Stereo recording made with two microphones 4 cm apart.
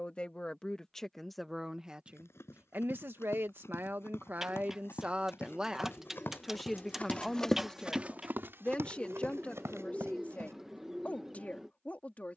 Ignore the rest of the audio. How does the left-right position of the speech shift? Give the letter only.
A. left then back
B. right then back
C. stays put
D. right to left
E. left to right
B.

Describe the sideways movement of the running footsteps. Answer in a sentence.
You can hear the running footsteps go from the left side to the right.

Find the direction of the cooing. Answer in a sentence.
You can hear the cooing in the centre.